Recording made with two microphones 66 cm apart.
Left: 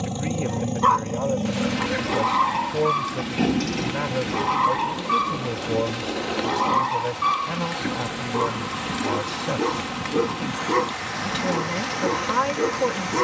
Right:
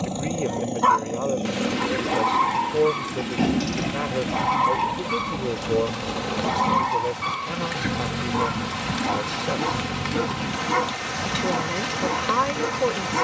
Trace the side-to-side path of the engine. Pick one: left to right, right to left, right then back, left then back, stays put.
left to right.